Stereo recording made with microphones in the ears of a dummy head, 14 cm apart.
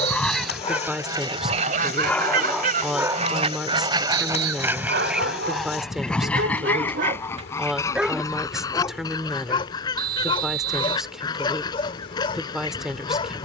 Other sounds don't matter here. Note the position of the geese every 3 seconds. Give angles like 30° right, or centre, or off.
30° right, 20° right, 20° left, 30° left, 30° left.